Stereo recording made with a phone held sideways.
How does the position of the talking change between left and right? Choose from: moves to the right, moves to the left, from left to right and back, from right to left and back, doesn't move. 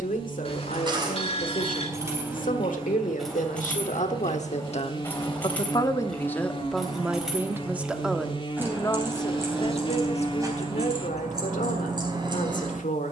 from left to right and back.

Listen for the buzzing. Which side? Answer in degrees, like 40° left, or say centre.
40° left.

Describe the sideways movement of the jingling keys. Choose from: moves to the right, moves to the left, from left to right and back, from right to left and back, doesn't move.
from right to left and back.